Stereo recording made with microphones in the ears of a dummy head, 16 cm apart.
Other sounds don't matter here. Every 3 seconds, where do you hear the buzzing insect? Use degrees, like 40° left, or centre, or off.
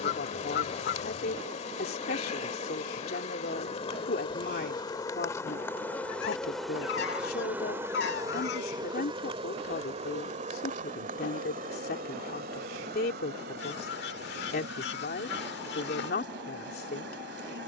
40° left, 30° left, 10° right, 40° right, 50° right, 60° right.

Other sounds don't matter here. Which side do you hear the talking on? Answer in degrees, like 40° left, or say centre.
50° left.